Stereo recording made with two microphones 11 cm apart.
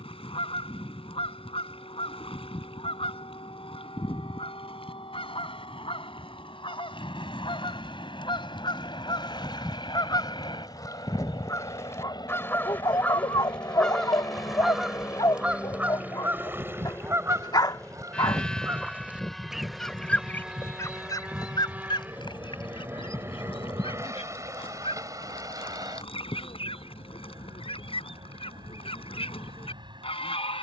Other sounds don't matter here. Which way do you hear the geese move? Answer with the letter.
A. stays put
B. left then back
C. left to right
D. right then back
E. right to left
D.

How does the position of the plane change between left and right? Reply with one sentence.
In this clip you hear the plane go from the left side to the right.